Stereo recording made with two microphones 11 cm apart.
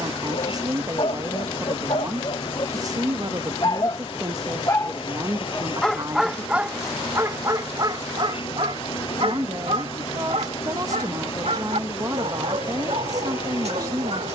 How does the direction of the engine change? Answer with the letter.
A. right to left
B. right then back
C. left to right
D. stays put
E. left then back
D.